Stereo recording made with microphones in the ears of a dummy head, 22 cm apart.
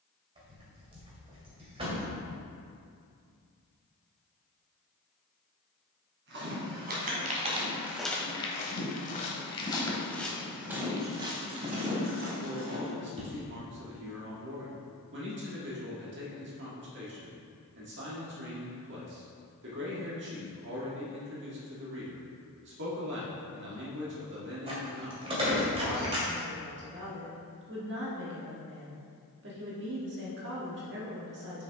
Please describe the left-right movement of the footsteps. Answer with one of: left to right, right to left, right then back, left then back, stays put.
left then back.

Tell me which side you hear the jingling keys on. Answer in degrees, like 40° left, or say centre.
20° right.